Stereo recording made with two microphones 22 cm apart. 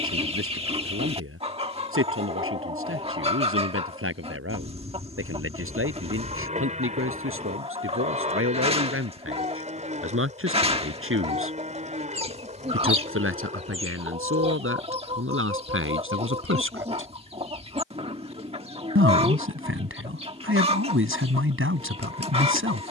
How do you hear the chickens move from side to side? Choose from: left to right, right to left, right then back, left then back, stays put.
stays put.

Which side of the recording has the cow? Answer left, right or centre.
right.